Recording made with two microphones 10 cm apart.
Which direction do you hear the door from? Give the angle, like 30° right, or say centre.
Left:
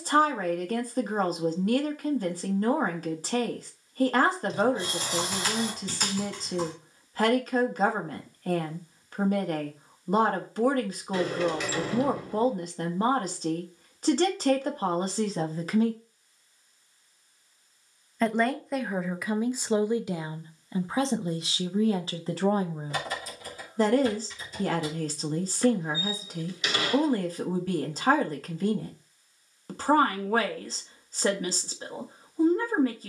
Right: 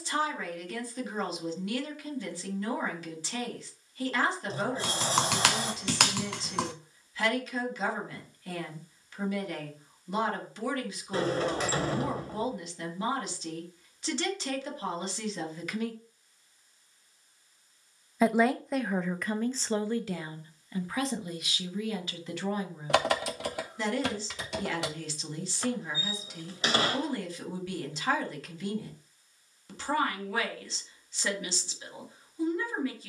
40° right.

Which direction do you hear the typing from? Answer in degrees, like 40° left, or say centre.
80° right.